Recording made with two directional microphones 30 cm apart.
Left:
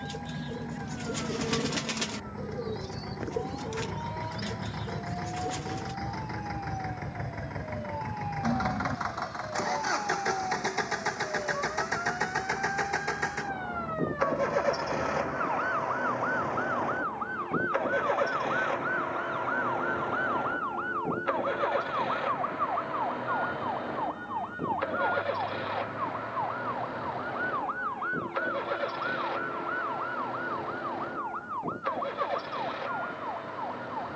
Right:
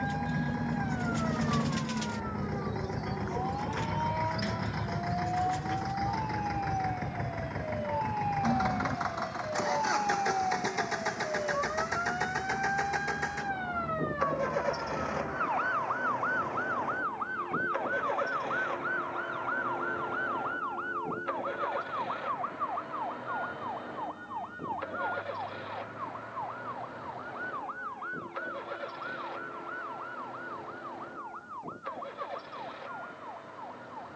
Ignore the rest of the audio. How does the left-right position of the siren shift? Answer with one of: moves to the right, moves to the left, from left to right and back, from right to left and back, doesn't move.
moves to the left.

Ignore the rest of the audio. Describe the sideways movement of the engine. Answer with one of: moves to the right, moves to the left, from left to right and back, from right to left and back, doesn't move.
moves to the left.